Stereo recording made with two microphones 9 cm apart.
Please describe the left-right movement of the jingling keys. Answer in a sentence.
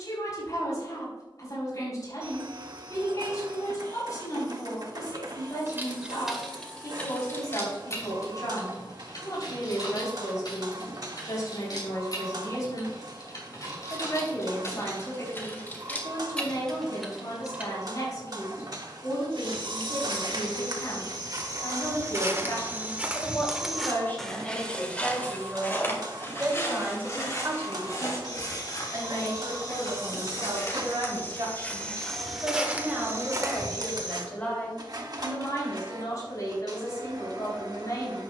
You can hear the jingling keys go left and come back.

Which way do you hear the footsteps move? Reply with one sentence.
You can hear the footsteps go left and come back.